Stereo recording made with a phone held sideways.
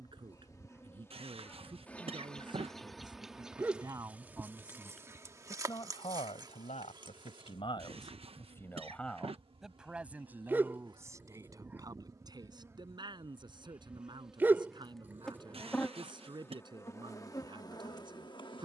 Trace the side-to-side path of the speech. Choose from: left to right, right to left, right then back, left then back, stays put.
left then back.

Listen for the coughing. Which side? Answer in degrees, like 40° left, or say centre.
40° right.